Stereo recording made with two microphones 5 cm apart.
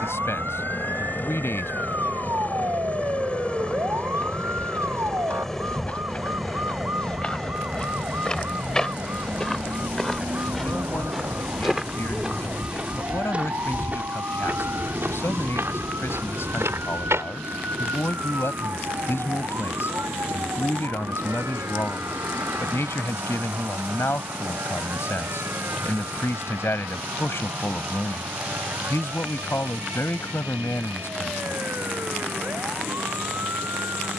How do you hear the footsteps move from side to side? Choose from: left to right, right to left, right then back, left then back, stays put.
left to right.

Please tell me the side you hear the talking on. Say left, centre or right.
left.